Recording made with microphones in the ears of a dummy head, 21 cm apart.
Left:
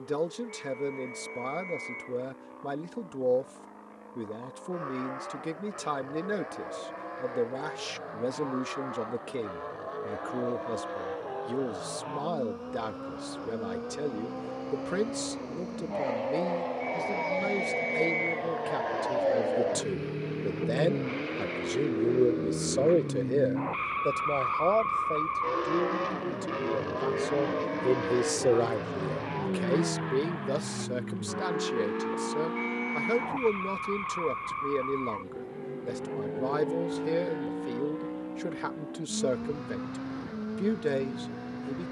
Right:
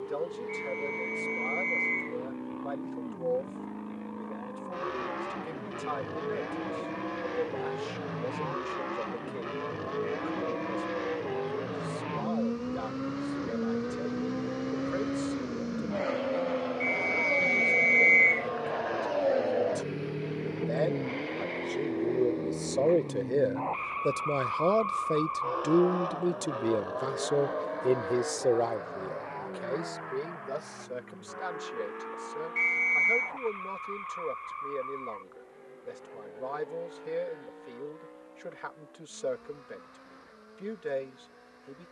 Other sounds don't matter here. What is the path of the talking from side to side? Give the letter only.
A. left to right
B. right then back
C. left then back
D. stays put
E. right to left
B.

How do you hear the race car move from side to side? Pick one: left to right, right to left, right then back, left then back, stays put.
right to left.